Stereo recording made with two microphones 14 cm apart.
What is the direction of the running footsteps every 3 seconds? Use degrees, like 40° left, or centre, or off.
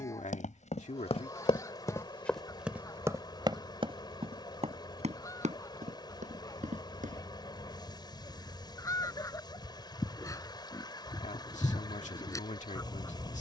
40° left, 40° right, 60° right, off, off.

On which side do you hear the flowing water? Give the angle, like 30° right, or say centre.
30° left.